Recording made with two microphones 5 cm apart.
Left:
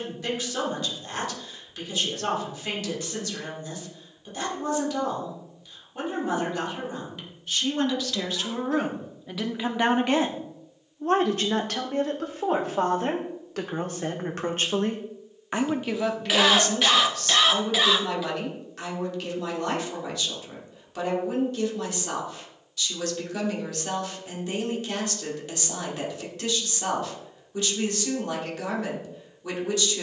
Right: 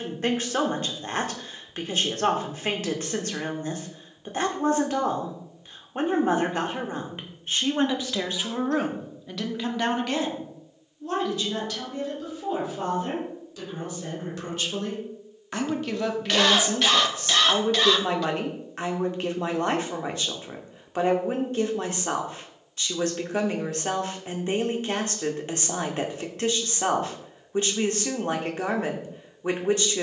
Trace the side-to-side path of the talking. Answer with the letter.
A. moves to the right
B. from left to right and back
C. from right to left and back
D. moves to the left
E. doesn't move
C.